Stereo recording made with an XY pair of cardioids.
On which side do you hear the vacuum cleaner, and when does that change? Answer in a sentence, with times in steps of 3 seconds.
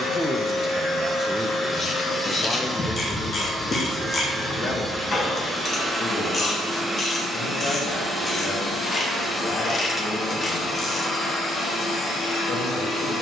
You can hear the vacuum cleaner on the left from 0 s, in the centre from 3 s and on the left from 9 s.